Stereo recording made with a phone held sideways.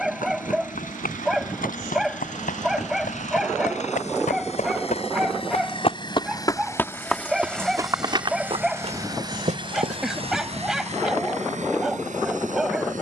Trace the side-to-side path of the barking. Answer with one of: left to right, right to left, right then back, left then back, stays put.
stays put.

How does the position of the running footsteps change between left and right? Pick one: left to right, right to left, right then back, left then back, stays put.
left to right.